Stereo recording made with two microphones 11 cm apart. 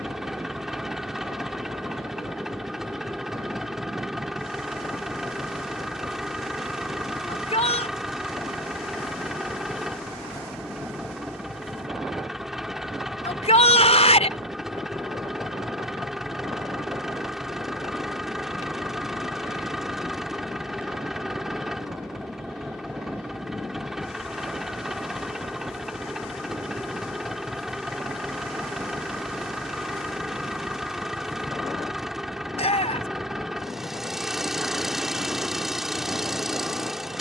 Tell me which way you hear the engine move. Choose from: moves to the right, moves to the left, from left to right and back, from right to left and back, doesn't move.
doesn't move.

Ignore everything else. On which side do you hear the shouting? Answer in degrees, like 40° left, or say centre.
70° left.